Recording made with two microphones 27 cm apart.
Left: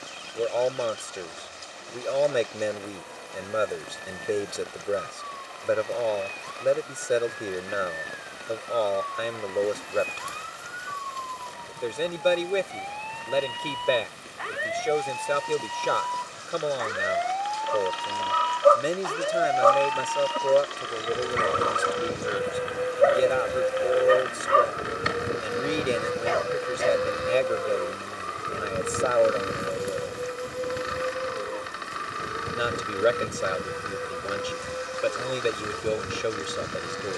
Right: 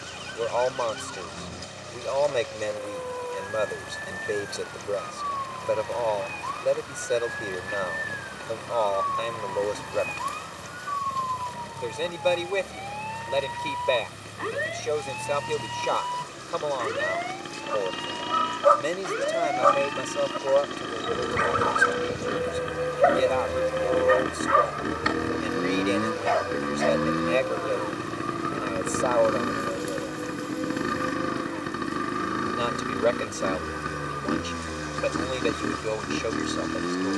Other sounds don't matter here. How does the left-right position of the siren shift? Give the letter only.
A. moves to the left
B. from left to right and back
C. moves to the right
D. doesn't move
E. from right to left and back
A.